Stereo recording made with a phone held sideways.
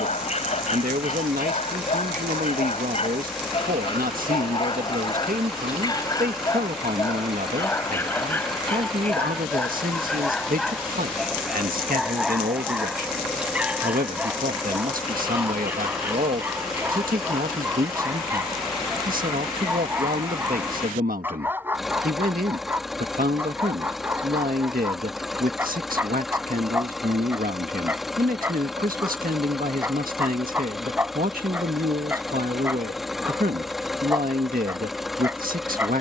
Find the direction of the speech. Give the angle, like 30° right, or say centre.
70° right.